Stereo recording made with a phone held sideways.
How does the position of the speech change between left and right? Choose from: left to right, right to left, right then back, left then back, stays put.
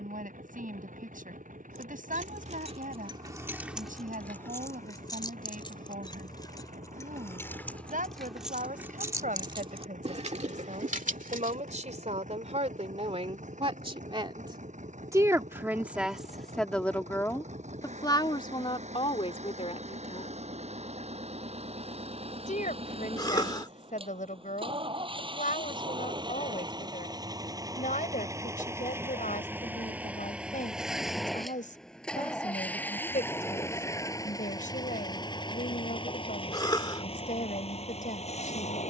right to left.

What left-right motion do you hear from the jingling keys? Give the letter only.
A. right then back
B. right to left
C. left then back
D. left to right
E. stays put
C.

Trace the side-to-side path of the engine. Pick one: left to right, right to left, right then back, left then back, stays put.
right to left.